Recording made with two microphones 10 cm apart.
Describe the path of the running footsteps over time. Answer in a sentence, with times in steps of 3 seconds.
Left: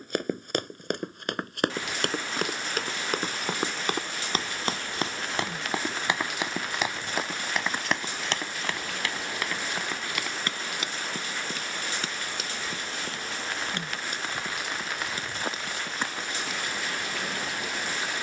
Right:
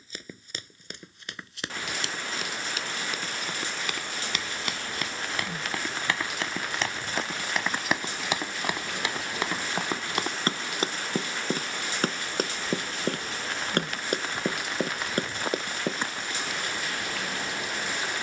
In this clip you hear the running footsteps on the left from 0 s, in the centre from 6 s and on the right from 9 s.